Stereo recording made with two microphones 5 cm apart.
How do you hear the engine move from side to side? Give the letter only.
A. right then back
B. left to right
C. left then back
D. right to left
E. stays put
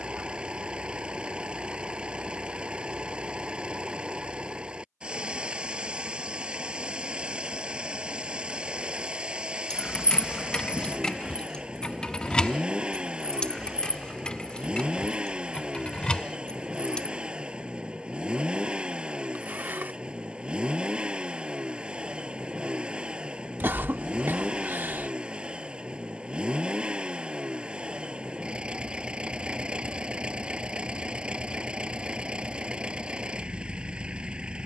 E.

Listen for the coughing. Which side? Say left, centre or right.
right.